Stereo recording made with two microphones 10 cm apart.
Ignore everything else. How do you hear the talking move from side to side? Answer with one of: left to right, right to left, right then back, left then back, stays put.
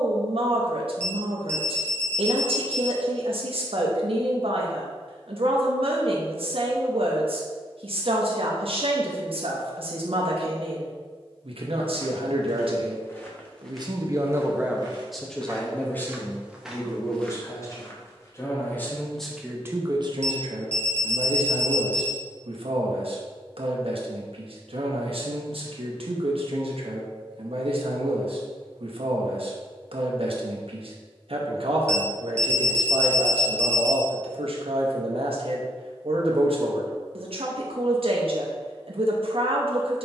left then back.